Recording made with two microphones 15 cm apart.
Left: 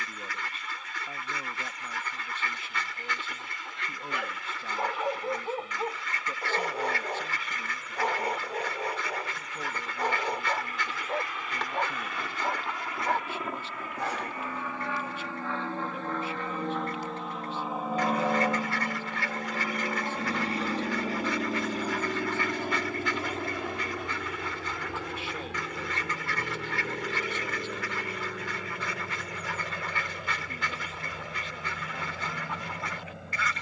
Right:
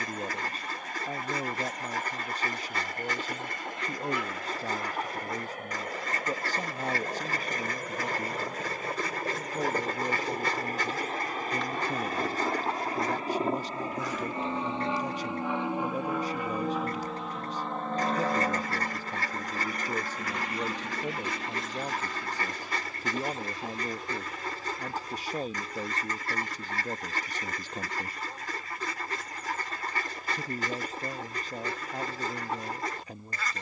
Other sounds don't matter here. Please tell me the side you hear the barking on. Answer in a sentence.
In this clip you hear the barking on the left.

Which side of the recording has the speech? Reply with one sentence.
You can hear the speech on the right.